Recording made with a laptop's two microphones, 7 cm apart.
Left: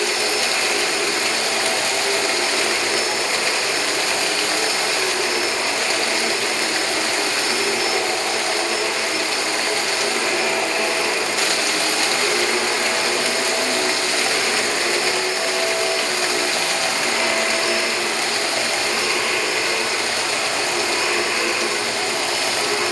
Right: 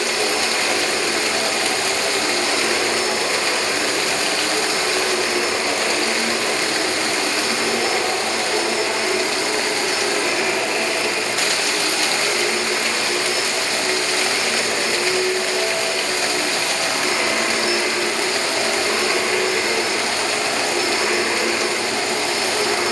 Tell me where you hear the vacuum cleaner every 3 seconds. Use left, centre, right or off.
right, right, right, centre, left, centre, right, right.